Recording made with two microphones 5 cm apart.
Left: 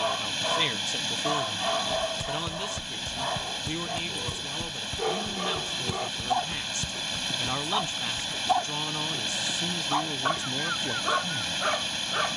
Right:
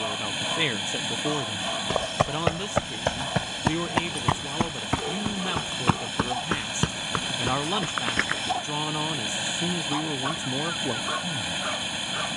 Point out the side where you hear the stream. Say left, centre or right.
centre.